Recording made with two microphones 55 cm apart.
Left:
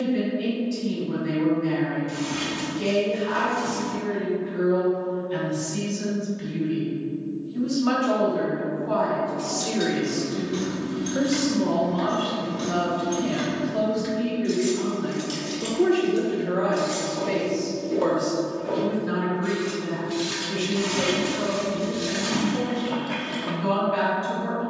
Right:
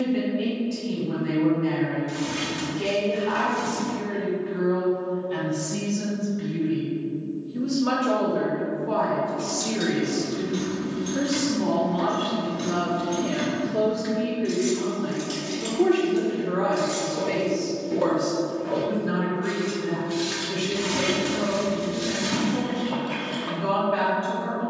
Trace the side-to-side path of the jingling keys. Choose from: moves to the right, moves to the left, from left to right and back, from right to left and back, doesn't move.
from right to left and back.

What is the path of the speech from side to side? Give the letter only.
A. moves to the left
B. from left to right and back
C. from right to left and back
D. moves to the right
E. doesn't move
C.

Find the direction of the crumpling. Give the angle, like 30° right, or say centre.
50° right.